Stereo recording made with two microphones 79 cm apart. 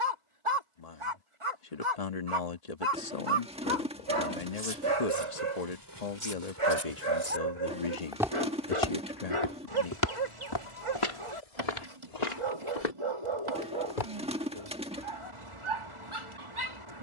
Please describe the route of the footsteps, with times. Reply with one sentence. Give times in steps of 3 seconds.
In this clip you hear the footsteps not at all from 0 s, on the right from 3 s, in the centre from 6 s, on the left from 9 s and not at all from 15 s.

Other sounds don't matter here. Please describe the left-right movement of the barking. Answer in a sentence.
In this clip you hear the barking stay put.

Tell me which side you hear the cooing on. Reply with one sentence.
In this clip you hear the cooing in the centre.